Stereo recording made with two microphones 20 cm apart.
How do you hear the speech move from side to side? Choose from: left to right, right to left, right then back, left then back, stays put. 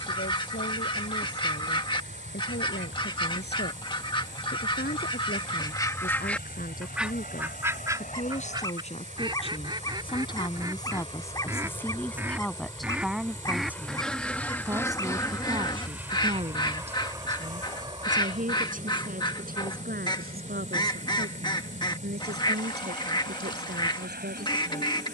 left to right.